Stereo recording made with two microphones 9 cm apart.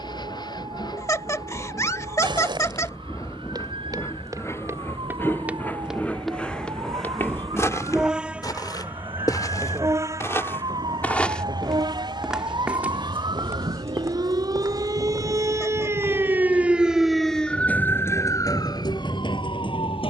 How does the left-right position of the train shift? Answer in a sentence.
In this clip you hear the train move to the right.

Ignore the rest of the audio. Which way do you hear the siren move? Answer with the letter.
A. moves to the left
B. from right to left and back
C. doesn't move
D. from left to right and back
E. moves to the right
A.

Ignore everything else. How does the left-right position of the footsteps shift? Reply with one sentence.
In this clip you hear the footsteps move from right to left and back again.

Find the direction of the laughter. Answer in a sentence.
In this clip you hear the laughter on the left.